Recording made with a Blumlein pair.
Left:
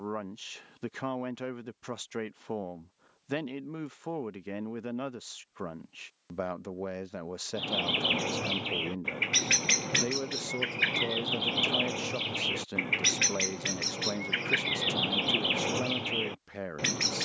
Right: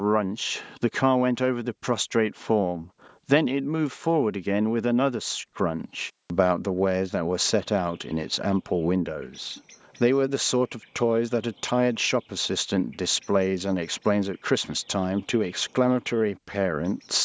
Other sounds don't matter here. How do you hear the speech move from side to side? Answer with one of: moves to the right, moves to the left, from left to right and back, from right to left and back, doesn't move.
doesn't move.